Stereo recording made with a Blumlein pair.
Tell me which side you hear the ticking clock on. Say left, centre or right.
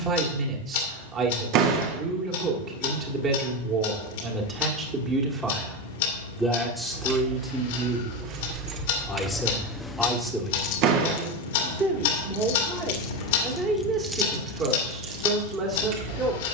left.